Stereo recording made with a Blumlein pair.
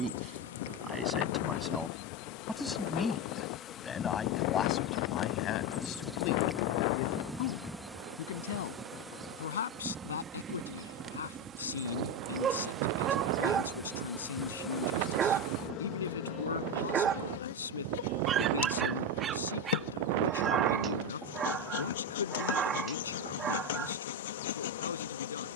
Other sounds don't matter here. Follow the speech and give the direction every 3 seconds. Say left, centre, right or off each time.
centre, left, left, left, left, left, left, left, left.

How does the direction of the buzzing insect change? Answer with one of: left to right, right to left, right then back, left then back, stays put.
right then back.